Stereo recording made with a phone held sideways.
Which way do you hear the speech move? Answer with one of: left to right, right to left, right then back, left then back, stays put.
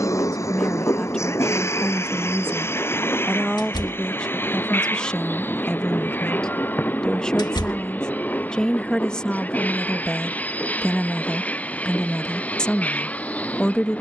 stays put.